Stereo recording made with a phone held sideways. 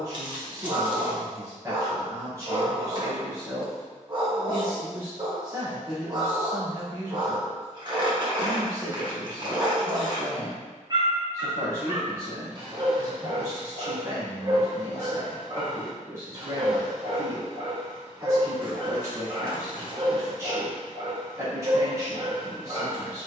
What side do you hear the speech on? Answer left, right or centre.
right.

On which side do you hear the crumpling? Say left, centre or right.
right.